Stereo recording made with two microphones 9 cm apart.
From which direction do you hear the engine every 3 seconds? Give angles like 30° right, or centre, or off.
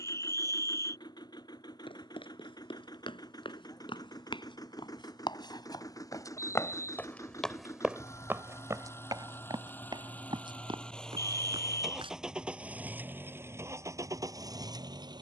50° left, 40° left, 30° left, 10° left, 30° right.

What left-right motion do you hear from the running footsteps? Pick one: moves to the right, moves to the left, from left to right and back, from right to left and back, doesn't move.
moves to the right.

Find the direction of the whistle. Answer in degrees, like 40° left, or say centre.
30° left.